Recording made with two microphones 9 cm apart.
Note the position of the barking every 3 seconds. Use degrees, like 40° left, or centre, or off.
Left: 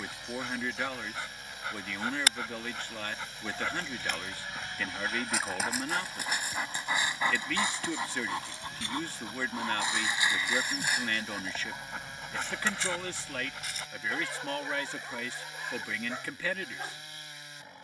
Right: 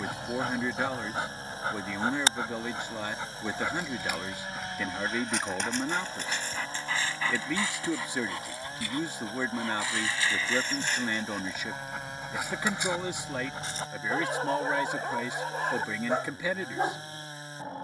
40° right, 10° right, 20° left, 10° left, 30° right, 50° right.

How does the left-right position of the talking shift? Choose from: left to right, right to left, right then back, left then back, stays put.
stays put.